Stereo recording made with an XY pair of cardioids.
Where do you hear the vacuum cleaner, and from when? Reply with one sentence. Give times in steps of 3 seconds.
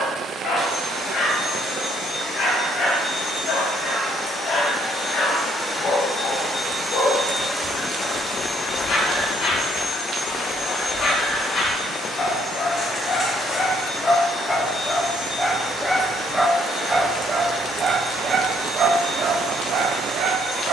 In this clip you hear the vacuum cleaner on the left from 0 s, in the centre from 6 s and on the left from 9 s.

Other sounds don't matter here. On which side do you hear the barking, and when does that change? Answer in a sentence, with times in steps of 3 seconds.
You can hear the barking on the left from 0 s, in the centre from 15 s and on the right from 18 s.